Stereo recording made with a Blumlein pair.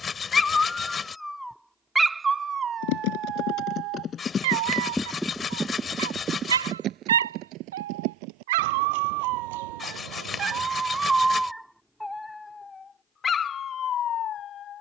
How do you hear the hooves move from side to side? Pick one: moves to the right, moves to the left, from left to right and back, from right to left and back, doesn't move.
moves to the right.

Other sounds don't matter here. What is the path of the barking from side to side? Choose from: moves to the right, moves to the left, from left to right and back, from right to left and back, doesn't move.
from left to right and back.